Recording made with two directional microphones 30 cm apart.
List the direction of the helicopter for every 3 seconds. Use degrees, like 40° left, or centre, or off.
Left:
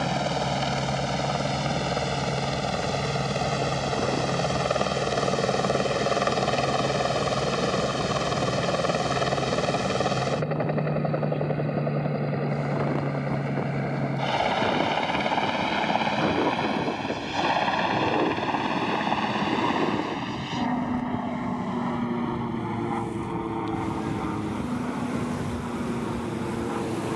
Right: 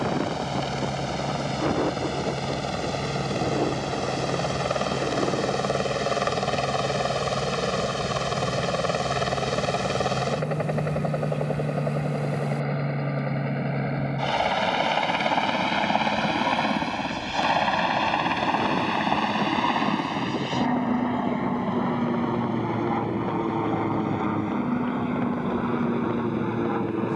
40° left, 30° left, 10° left, 10° right, 20° right, 30° right, 40° right, 40° right, 50° right.